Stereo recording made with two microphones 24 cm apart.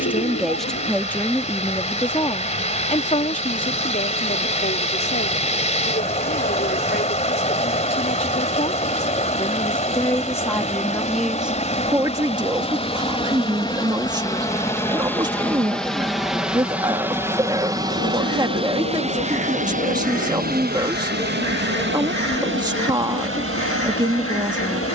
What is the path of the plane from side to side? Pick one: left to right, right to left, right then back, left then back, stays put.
left to right.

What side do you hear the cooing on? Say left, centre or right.
left.